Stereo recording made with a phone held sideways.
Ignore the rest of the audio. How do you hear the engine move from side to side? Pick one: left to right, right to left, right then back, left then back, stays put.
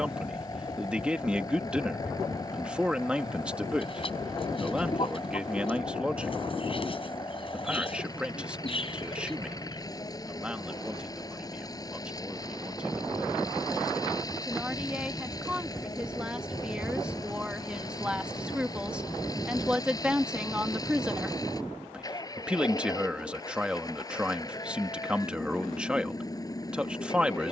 stays put.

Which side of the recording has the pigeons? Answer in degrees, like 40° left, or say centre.
40° left.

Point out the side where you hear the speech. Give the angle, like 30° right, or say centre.
10° right.